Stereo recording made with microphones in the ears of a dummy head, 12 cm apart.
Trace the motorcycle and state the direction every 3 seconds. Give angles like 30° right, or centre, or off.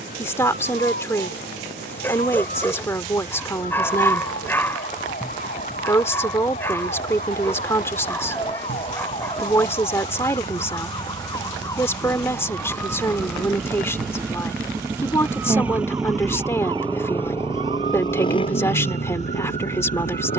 50° right, 50° right, 50° right, 40° right, 30° right, centre, 50° left.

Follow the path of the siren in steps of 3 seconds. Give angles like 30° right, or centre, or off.
60° left, 50° left, 40° left, 30° left, centre, 30° right, 50° right.